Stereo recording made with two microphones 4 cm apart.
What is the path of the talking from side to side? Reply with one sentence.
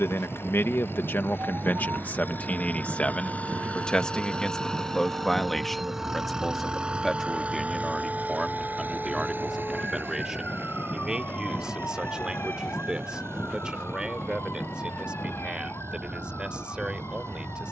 You can hear the talking move from left to right.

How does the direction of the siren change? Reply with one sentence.
In this clip you hear the siren move to the left.